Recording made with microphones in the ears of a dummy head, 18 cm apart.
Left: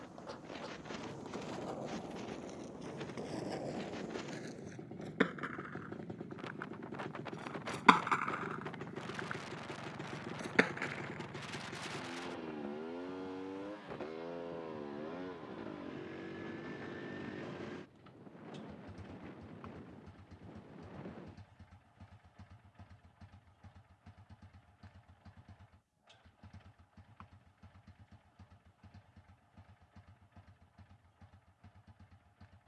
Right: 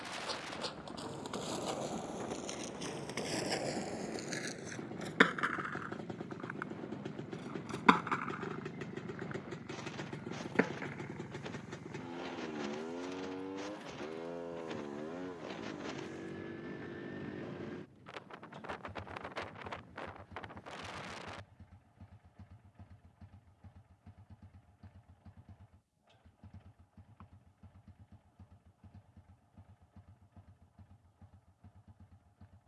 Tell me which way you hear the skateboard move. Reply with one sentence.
In this clip you hear the skateboard move from right to left.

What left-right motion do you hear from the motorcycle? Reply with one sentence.
You can hear the motorcycle move to the left.